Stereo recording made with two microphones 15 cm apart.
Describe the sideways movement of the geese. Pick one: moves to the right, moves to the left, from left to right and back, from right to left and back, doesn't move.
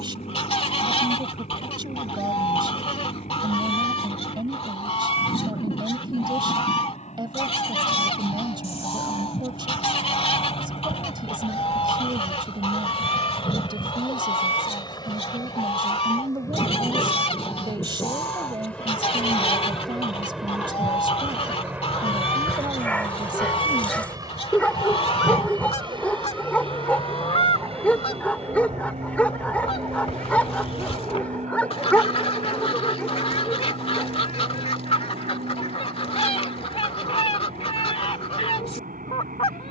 doesn't move.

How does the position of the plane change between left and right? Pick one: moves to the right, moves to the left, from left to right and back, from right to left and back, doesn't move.
moves to the right.